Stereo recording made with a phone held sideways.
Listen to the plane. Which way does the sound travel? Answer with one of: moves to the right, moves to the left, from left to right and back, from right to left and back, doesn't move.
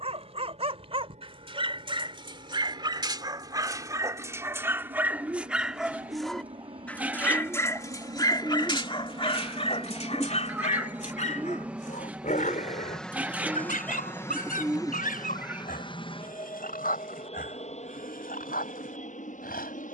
moves to the left.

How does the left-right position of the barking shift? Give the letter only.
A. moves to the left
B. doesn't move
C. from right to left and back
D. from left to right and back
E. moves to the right
A.